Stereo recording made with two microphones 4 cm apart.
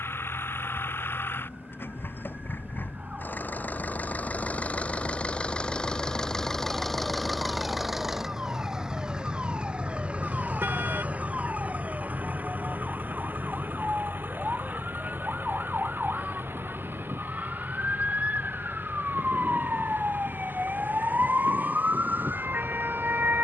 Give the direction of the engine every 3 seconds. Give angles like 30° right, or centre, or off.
60° left, 30° left, centre, 30° right, 50° right, 50° right, 60° right, 60° right.